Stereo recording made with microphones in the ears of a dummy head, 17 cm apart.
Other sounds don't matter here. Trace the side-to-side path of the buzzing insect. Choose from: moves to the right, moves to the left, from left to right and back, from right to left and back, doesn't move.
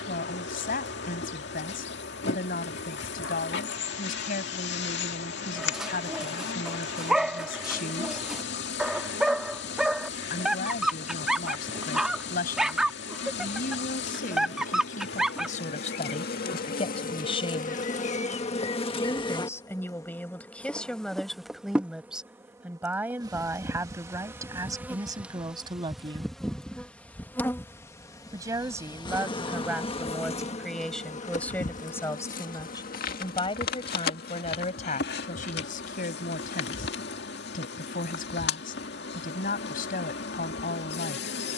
from left to right and back.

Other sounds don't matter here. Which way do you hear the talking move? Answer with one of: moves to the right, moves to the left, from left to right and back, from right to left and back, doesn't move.
from left to right and back.